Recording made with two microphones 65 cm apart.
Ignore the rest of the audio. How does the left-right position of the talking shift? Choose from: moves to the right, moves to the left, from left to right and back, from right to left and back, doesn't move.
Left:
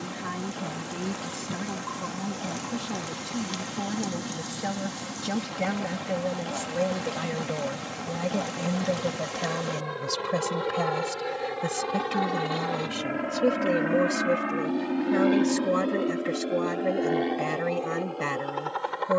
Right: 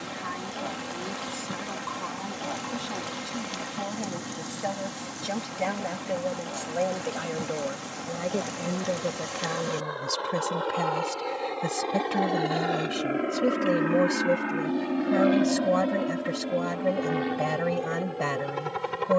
moves to the right.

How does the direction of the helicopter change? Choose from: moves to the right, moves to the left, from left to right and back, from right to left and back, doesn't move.
moves to the right.